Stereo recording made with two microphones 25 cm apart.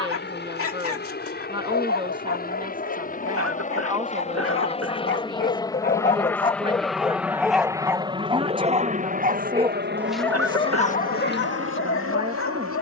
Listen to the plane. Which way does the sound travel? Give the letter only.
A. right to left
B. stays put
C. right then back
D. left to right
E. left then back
D.